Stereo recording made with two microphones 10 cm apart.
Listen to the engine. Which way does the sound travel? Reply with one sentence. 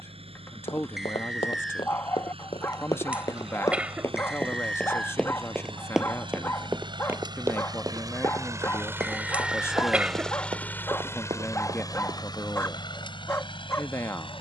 You can hear the engine move to the left.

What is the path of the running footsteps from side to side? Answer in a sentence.
In this clip you hear the running footsteps go from the left side to the right.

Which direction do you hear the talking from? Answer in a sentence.
You can hear the talking on the left.